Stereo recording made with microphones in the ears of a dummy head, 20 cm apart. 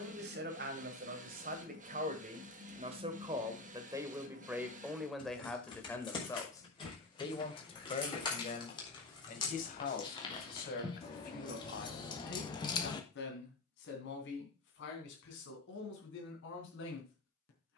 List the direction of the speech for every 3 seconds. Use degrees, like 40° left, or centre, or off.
40° right, 10° right, 30° left, 50° left, 60° left, 60° left.